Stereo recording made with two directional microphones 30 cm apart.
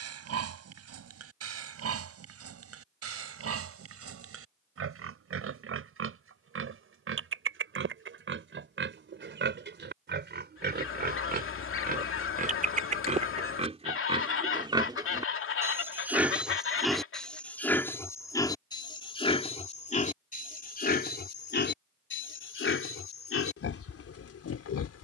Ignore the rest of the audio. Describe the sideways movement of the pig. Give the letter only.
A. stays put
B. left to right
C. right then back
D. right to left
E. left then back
D.